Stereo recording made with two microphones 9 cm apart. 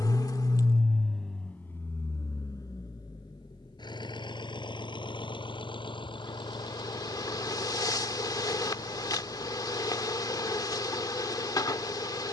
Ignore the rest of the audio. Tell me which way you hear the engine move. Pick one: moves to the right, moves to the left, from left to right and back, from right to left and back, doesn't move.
moves to the left.